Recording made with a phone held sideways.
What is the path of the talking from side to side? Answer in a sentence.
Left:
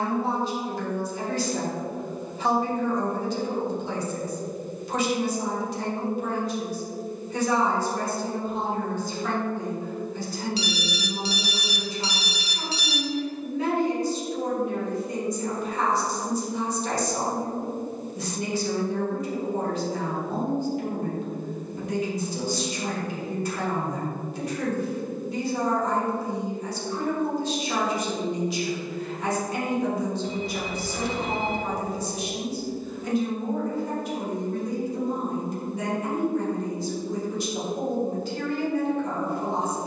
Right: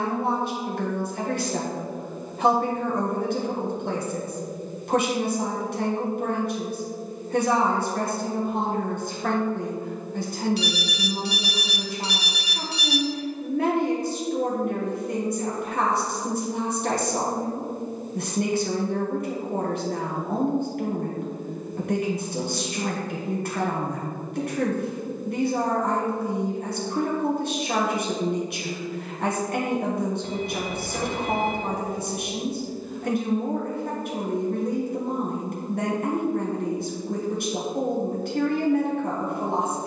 In this clip you hear the talking stay put.